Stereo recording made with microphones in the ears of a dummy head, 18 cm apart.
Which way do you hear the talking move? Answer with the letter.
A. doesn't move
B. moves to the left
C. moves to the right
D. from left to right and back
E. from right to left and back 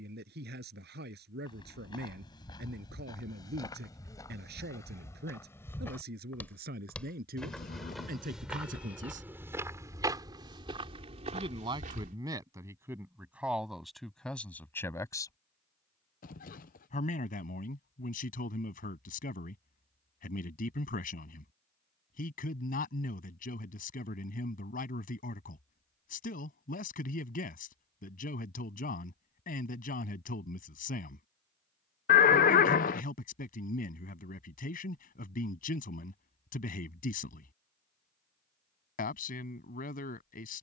B.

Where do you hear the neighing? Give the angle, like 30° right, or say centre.
40° left.